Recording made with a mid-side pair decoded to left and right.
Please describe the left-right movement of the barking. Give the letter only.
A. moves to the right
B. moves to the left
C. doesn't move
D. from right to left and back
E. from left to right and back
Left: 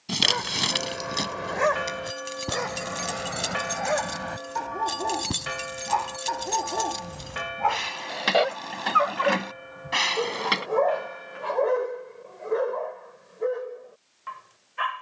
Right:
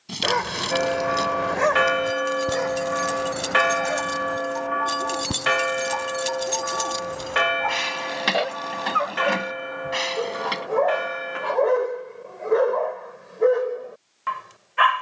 D.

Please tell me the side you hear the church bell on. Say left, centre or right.
right.